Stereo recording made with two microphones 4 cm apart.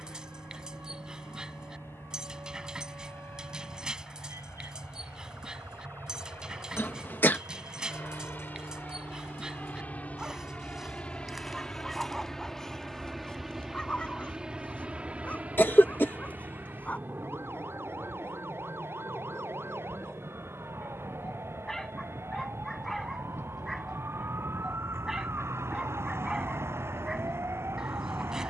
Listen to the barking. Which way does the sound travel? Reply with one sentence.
You can hear the barking move from right to left and back again.